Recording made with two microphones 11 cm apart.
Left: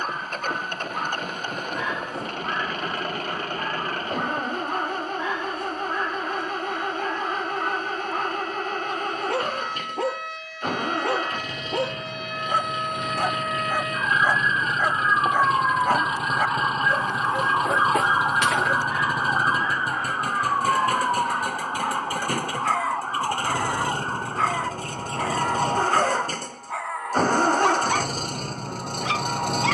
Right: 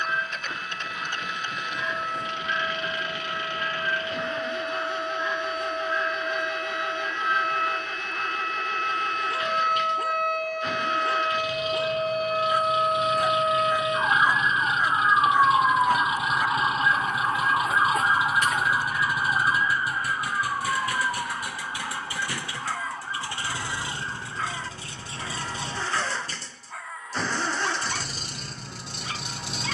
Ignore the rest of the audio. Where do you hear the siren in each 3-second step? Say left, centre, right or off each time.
right, right, right, right, right, centre, left, left, left, left.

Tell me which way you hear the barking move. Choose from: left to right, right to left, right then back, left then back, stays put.
stays put.